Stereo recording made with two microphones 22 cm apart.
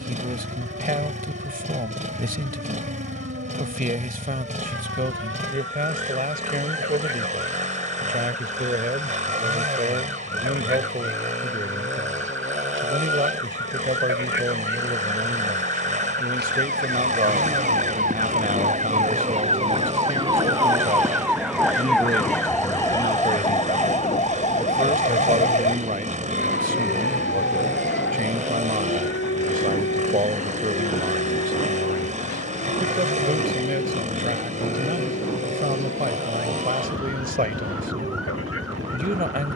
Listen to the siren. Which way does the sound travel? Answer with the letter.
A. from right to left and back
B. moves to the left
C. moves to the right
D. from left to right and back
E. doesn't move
B.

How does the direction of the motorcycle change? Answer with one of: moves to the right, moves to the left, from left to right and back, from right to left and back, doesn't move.
doesn't move.